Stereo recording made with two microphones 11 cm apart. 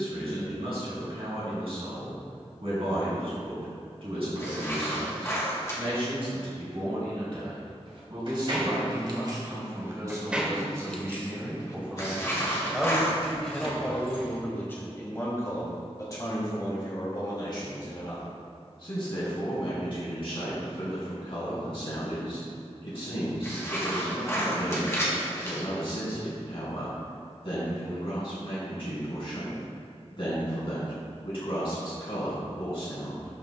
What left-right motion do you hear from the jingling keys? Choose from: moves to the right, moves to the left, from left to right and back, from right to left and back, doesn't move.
moves to the left.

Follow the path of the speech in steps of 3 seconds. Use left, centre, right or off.
right, right, right, right, centre, left, left, left, left, left, left.